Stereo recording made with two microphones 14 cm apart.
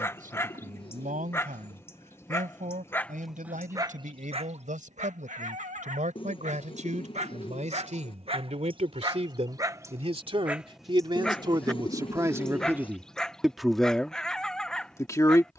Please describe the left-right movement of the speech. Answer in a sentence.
You can hear the speech travel towards the left.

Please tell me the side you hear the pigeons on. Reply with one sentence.
In this clip you hear the pigeons on the left.